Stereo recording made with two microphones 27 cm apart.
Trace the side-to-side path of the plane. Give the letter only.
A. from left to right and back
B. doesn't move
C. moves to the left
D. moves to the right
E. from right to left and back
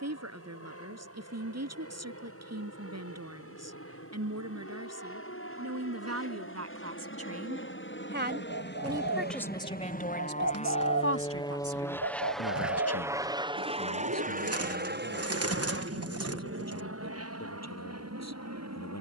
D.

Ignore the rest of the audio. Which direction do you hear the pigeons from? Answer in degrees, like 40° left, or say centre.
60° right.